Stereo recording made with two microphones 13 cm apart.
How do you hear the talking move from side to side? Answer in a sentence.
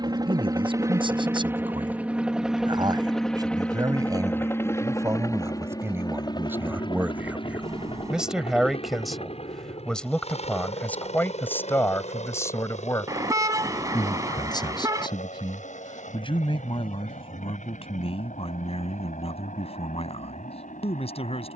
You can hear the talking move from right to left.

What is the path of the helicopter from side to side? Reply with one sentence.
You can hear the helicopter go from the right side to the left.